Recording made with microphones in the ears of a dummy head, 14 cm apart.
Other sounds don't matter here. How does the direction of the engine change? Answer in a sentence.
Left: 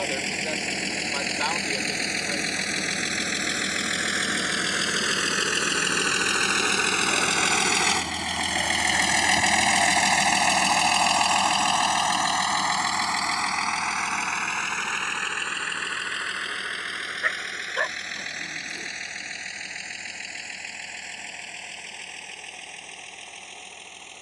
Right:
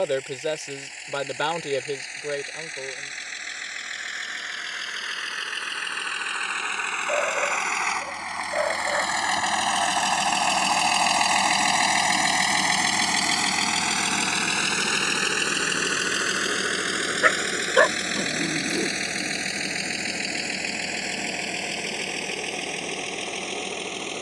In this clip you hear the engine move to the right.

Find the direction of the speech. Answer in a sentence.
In this clip you hear the speech on the right.